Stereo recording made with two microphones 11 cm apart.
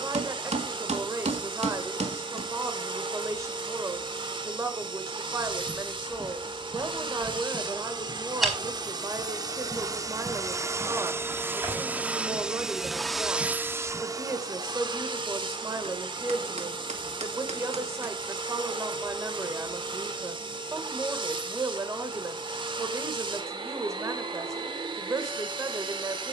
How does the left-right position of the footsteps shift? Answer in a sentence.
You can hear the footsteps move to the right.